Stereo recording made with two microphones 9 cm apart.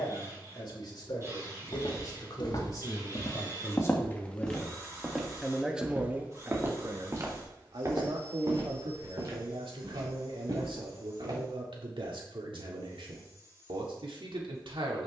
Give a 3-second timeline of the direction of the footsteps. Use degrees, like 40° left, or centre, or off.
60° left, 10° left, 30° right, 50° right, off.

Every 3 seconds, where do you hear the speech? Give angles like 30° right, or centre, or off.
50° left, 20° left, 50° right, 80° right, 80° right.